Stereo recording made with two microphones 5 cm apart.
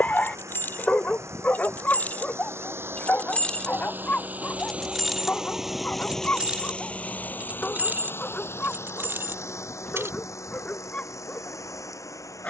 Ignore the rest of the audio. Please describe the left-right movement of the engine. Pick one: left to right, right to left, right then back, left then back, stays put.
right to left.